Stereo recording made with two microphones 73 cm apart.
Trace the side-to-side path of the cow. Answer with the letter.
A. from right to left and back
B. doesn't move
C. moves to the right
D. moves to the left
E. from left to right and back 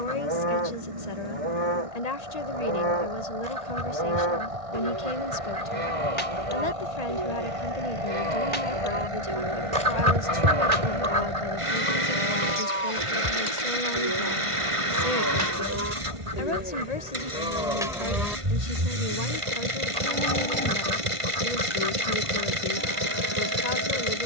D.